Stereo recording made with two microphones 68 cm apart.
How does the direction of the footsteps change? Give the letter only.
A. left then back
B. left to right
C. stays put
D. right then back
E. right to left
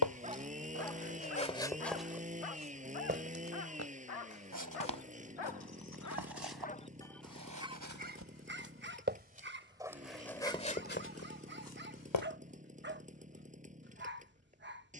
D.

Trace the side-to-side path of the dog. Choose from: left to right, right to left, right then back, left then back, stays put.
left then back.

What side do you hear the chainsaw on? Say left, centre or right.
centre.